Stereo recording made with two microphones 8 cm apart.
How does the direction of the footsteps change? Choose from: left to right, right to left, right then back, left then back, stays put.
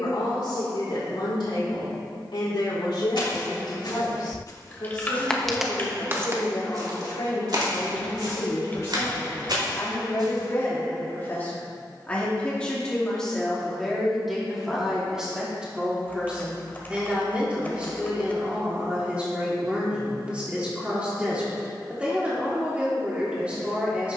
left to right.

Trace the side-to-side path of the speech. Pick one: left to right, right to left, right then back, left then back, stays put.
left to right.